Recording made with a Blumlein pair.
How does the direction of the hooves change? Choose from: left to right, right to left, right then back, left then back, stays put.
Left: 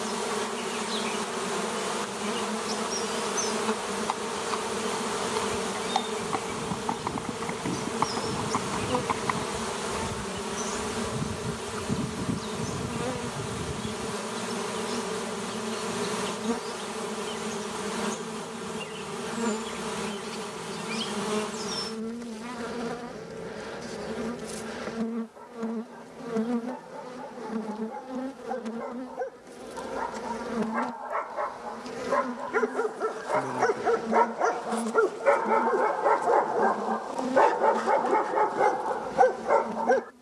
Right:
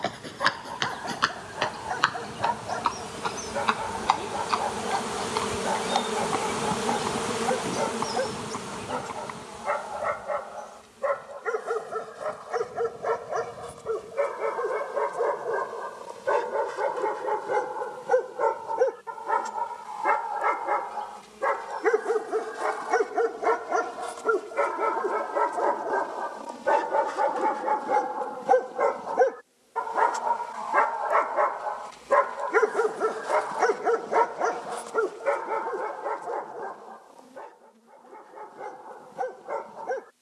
right to left.